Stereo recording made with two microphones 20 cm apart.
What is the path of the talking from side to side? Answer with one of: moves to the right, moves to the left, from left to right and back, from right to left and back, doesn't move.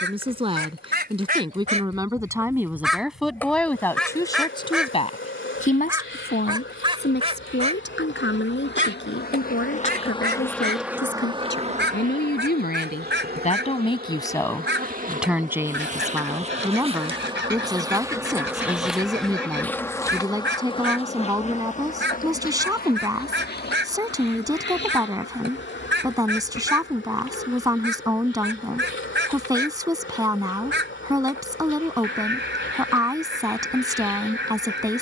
from right to left and back.